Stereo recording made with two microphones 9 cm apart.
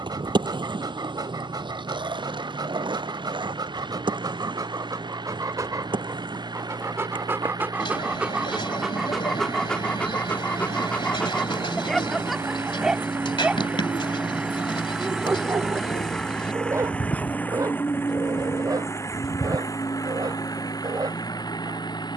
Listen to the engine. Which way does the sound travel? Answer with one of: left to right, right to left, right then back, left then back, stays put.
right to left.